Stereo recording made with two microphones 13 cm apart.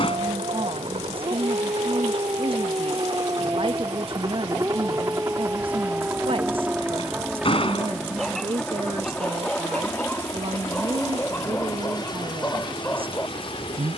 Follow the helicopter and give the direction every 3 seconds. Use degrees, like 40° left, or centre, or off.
50° right, 30° right, centre, 20° left, 40° left.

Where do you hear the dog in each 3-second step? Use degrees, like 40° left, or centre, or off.
40° right, 20° right, centre, 10° left, 20° left.